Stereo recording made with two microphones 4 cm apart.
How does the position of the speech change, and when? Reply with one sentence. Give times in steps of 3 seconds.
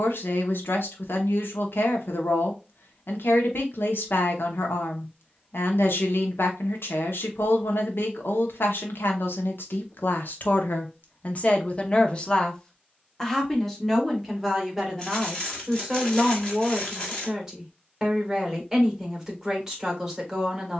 You can hear the speech on the left from 0 s and in the centre from 12 s.